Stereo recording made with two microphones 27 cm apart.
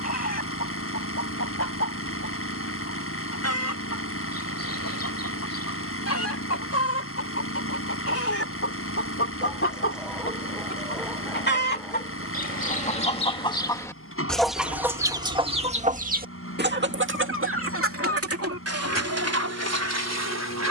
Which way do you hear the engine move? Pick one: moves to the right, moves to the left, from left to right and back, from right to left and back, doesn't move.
doesn't move.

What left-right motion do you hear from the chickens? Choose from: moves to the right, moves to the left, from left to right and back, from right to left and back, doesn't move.
moves to the right.